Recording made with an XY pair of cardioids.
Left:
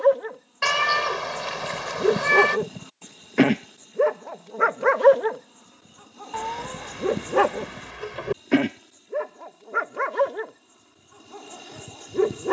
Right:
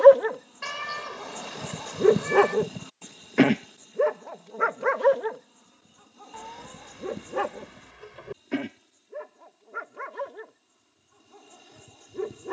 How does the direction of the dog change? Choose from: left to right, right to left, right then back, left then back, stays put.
right to left.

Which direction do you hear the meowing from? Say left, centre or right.
left.